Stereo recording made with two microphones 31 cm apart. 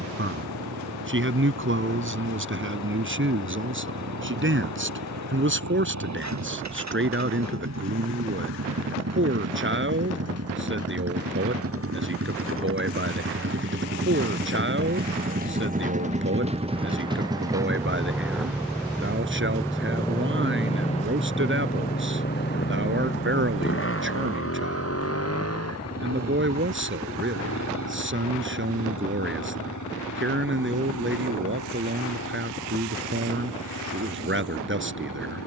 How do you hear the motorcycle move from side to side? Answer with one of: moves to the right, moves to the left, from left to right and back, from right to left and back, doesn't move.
moves to the left.